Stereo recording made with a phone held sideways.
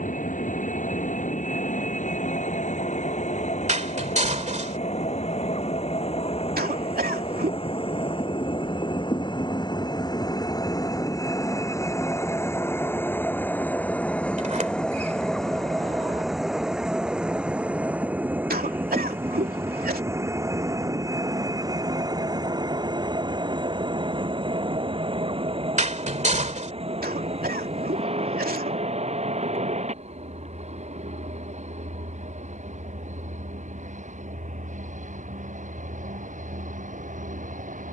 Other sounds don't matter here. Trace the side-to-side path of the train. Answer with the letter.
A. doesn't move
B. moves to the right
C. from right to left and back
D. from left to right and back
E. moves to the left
B.